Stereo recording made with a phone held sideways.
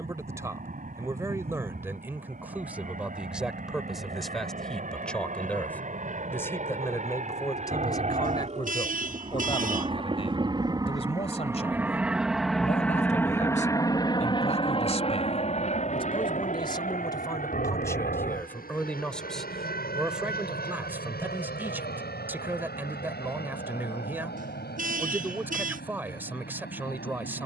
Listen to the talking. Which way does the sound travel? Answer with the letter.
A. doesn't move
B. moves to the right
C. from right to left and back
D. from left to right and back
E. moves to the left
C.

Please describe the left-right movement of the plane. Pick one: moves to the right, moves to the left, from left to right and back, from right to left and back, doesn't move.
moves to the left.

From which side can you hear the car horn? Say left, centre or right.
right.